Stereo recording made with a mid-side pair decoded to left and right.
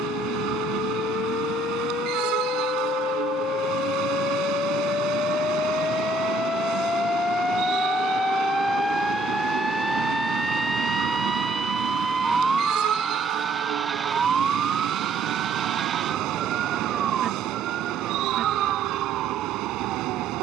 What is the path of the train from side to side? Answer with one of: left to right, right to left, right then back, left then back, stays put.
stays put.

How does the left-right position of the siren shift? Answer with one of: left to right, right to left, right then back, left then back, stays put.
left to right.